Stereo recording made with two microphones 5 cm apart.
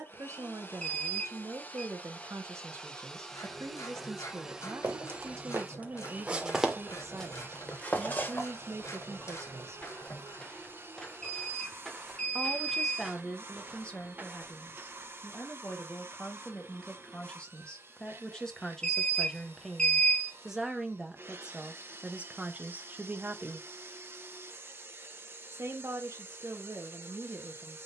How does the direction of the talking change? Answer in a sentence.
In this clip you hear the talking go left and come back.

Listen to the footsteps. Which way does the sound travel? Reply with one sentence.
You can hear the footsteps move from right to left and back again.